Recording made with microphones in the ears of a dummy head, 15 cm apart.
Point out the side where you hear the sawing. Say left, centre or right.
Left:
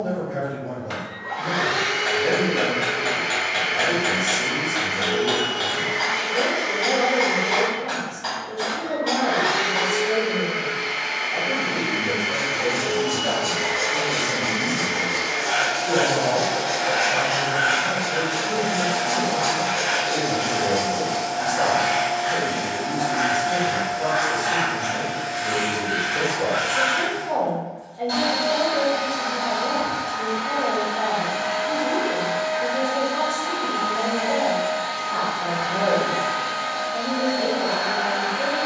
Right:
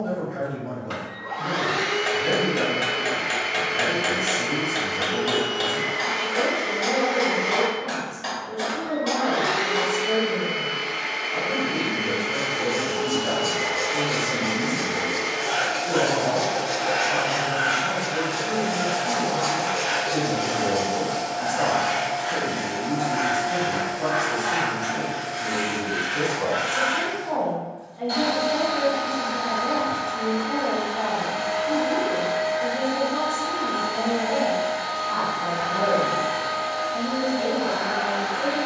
centre.